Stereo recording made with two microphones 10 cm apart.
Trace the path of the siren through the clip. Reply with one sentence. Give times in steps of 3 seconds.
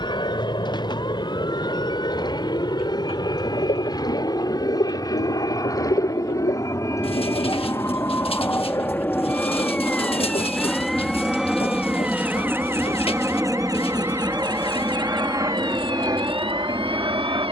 In this clip you hear the siren on the left from 0 s, in the centre from 9 s and on the right from 12 s.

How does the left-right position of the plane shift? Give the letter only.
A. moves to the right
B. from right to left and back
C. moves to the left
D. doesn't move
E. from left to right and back
A.